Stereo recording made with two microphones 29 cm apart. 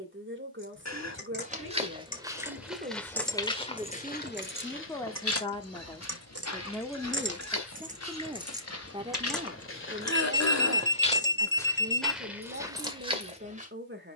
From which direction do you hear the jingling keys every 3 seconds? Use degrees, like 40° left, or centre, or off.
30° left, 40° right, 30° right, 10° left, off.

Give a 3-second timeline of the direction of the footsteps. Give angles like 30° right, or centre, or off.
10° right, 40° left, 60° left, 30° left, 10° right.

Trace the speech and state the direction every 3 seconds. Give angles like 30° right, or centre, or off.
40° right, centre, centre, 30° right, 40° right.